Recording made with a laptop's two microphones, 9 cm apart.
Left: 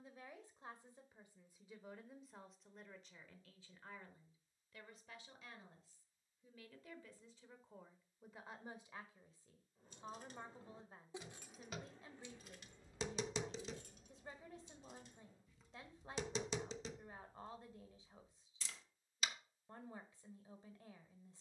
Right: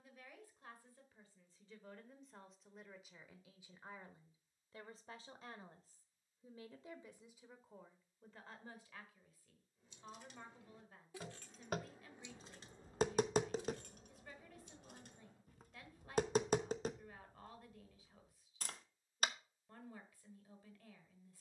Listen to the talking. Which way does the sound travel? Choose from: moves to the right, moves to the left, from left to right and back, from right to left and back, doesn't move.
from left to right and back.